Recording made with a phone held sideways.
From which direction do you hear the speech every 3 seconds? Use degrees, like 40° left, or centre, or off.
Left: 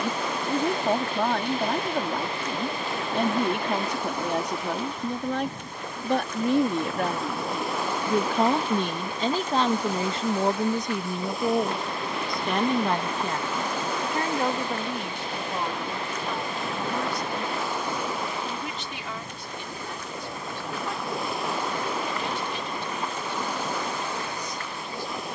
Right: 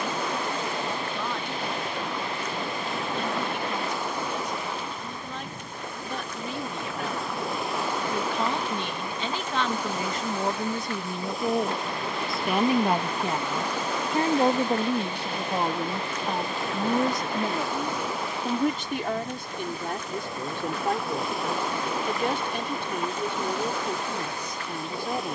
70° left, 70° left, 60° left, 20° left, 20° right, 40° right, 50° right, 60° right, 60° right.